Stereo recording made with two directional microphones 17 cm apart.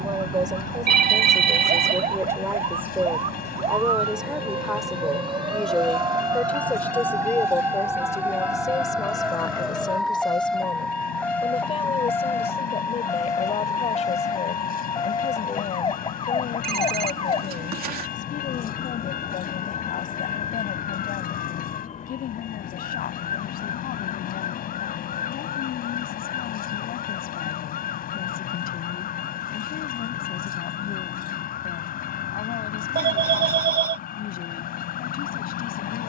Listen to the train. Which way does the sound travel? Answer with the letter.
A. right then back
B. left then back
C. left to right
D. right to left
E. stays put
E.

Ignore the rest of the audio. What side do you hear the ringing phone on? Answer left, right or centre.
right.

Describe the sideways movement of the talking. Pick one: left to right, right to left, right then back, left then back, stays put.
right to left.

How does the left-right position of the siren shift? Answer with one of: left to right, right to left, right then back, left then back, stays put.
right to left.